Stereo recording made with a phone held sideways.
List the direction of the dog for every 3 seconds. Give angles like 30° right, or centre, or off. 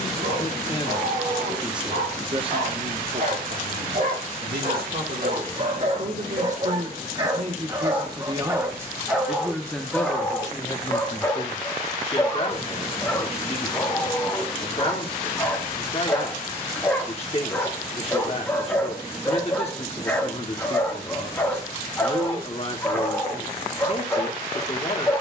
60° right, 50° right, 30° right, centre, 10° left, 10° left, 10° left, 10° left, 10° left.